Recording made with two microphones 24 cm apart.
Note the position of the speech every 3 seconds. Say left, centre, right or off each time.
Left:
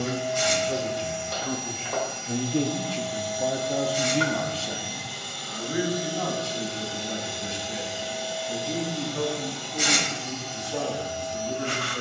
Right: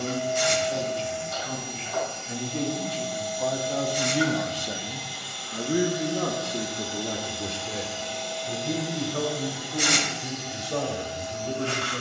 left, centre, right, right.